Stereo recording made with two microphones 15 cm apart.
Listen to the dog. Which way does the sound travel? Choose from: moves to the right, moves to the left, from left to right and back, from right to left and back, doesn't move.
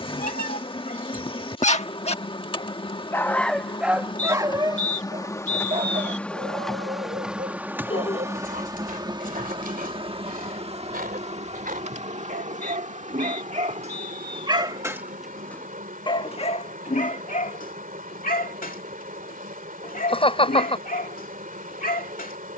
from left to right and back.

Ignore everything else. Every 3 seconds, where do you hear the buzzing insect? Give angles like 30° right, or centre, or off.
30° left, 30° left, 10° right, 40° right, 60° right, 60° right, 60° right, 60° right.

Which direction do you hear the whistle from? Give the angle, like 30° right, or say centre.
50° left.